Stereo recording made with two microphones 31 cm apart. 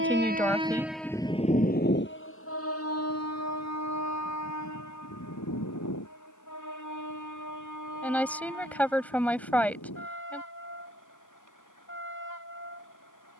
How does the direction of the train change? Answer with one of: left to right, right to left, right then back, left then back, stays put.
right to left.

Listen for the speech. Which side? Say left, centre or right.
centre.